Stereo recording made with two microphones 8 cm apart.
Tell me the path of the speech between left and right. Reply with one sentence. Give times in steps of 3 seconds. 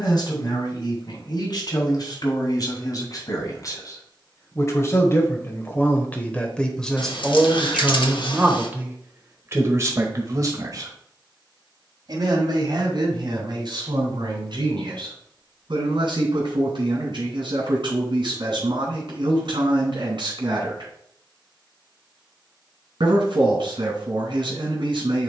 In this clip you hear the speech on the left from 0 s, in the centre from 6 s and on the right from 9 s.